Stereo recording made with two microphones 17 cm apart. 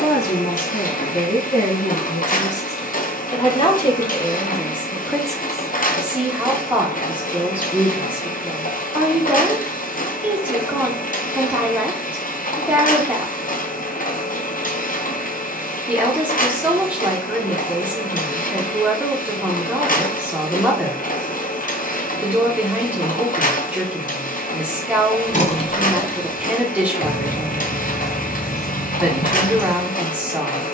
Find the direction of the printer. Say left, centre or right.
left.